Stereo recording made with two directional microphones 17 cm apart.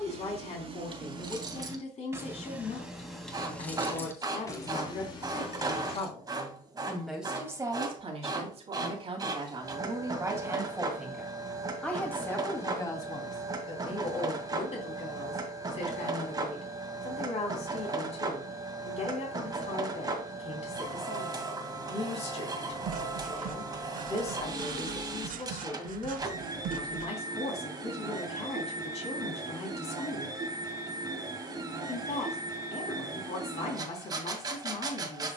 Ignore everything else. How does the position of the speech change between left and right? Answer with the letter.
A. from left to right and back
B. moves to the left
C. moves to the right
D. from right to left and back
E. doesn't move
A.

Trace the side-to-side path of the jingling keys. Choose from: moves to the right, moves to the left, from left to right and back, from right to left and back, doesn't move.
moves to the left.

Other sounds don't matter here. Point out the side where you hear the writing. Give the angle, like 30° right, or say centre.
50° right.